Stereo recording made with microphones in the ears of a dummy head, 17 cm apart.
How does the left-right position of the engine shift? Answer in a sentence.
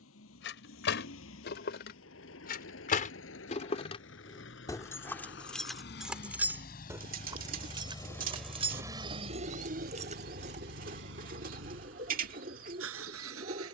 In this clip you hear the engine move to the right.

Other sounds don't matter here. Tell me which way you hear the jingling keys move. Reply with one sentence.
In this clip you hear the jingling keys move from left to right.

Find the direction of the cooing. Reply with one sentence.
In this clip you hear the cooing on the right.